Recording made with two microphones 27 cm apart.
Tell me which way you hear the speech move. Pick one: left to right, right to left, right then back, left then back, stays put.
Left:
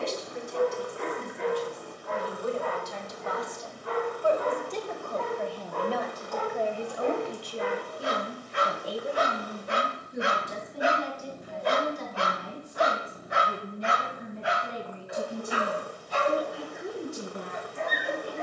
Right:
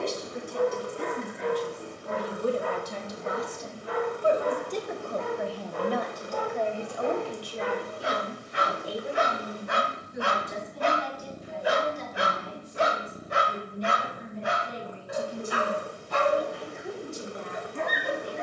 right to left.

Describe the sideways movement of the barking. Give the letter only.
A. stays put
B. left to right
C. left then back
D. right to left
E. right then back
B.